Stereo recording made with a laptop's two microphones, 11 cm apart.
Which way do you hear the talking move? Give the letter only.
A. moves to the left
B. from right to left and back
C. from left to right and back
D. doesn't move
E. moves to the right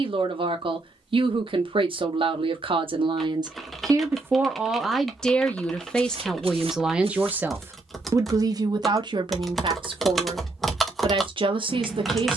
B.